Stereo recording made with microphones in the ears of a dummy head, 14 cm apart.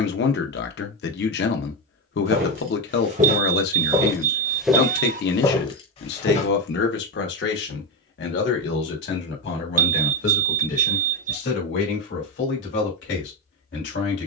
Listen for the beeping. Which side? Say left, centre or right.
right.